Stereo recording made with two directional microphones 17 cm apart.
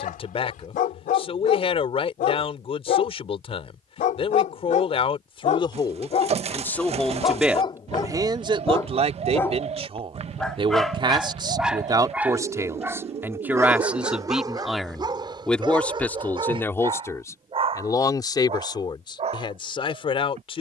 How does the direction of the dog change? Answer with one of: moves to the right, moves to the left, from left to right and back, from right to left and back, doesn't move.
moves to the right.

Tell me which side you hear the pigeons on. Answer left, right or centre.
right.